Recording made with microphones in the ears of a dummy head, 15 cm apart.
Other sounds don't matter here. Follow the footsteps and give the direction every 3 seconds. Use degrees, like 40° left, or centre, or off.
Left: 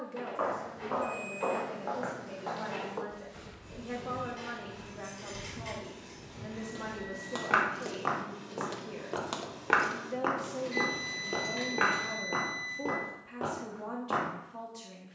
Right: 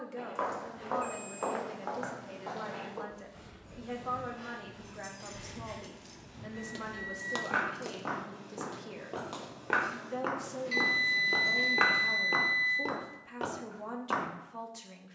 30° right, 50° left, 50° left, centre, 50° right.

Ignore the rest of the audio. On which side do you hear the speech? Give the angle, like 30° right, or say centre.
20° right.